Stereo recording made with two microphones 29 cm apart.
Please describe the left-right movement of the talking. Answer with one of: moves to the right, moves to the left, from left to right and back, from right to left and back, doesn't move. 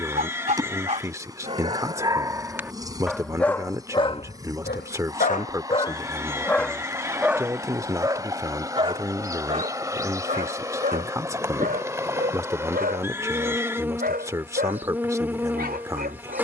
doesn't move.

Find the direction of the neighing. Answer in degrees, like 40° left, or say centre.
10° right.